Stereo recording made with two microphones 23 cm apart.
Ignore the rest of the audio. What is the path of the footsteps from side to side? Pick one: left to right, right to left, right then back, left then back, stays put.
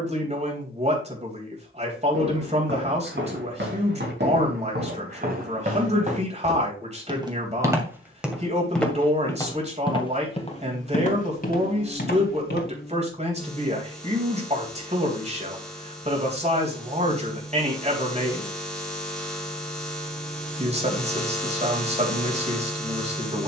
right to left.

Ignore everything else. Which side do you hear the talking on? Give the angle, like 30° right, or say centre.
30° right.